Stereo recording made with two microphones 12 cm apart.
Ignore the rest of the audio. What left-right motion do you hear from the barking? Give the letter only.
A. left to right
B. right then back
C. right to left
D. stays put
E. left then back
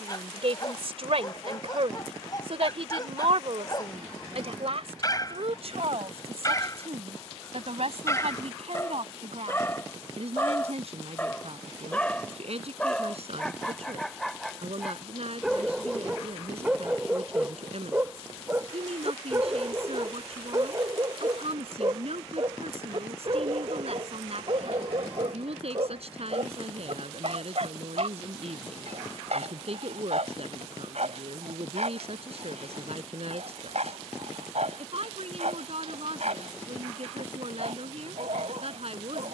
A.